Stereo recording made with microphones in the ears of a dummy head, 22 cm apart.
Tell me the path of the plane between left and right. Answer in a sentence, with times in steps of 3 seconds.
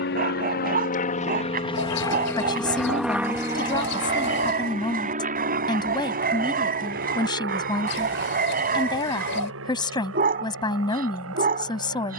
You can hear the plane on the left from 0 s and on the right from 3 s.